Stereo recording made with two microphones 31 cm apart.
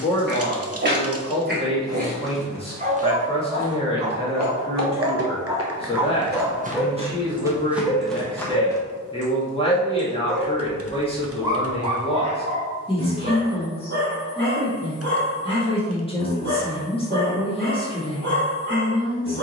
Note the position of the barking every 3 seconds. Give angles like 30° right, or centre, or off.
30° right, 20° right, centre, centre, 30° right, 40° right, 40° right.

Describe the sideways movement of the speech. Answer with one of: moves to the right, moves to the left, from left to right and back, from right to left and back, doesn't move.
doesn't move.